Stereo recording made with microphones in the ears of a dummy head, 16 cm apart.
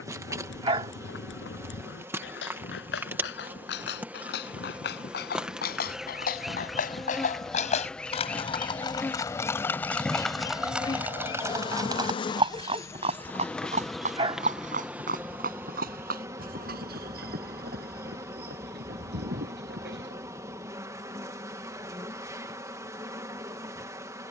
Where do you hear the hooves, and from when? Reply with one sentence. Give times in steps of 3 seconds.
You can hear the hooves on the left from 0 s, in the centre from 9 s, on the right from 12 s and not at all from 21 s.